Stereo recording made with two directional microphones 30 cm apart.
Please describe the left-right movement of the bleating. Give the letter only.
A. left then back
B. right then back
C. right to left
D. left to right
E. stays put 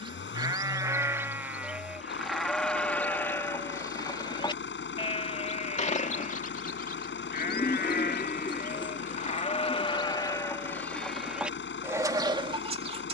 A.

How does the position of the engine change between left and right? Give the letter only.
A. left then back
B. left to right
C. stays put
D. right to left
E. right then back
C.